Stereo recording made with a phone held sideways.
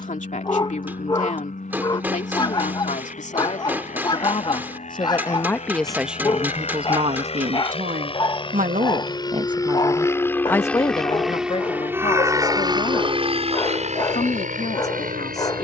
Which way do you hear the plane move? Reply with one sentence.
You can hear the plane move to the right.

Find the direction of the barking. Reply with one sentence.
You can hear the barking on the left.